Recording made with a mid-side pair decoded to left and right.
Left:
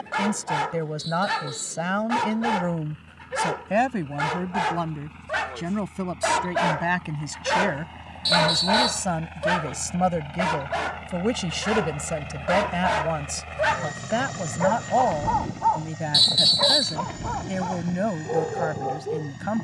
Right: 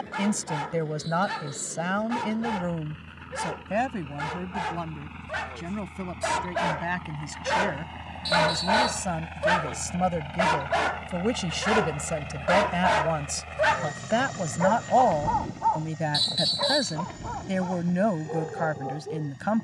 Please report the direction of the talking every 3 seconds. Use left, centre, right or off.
centre, left, left, left, centre, right, right.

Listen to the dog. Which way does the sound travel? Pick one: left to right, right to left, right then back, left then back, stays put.
right then back.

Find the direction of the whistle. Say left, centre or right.
left.